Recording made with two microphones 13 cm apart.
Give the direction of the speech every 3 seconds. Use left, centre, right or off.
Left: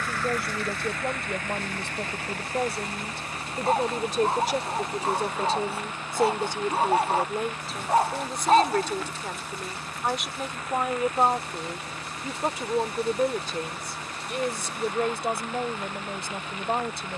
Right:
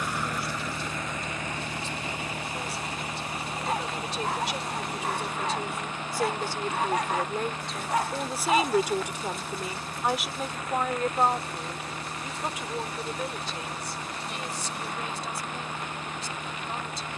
left, left, centre, centre, left, left.